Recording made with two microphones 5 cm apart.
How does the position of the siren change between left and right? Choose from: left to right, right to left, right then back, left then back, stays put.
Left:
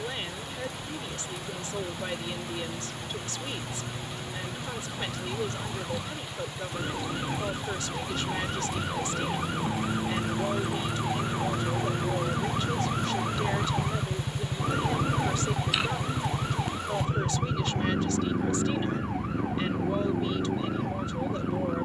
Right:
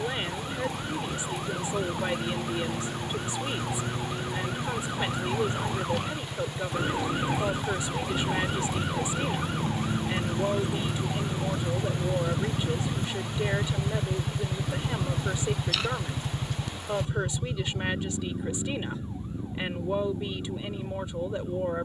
right to left.